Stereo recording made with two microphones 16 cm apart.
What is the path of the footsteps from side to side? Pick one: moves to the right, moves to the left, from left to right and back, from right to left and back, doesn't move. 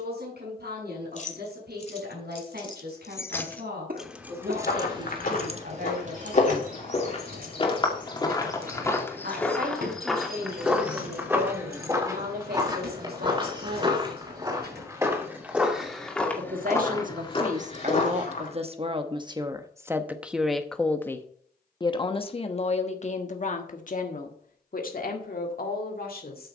from left to right and back.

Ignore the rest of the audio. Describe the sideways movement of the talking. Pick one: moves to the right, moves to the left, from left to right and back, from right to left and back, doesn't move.
moves to the left.